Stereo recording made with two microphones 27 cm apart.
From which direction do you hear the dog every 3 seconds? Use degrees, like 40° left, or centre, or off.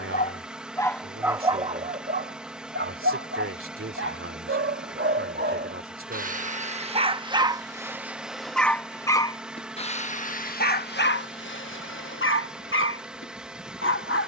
10° right, 40° right, 10° right, 30° left, 50° left.